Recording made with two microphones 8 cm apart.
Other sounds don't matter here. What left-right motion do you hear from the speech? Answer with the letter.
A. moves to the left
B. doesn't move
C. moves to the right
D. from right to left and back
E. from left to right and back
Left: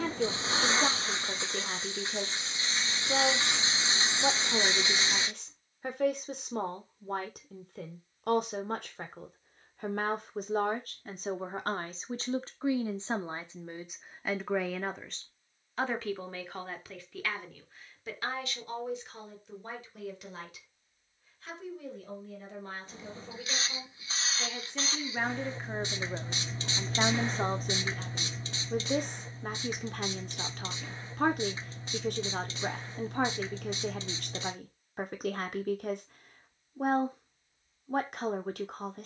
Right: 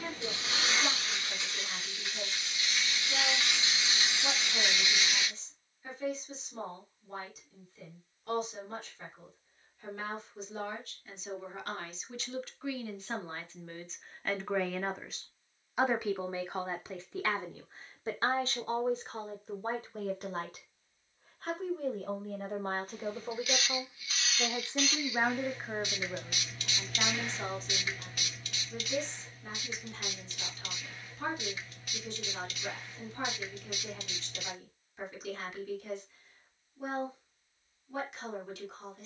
E.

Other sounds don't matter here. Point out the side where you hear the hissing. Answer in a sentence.
In this clip you hear the hissing on the left.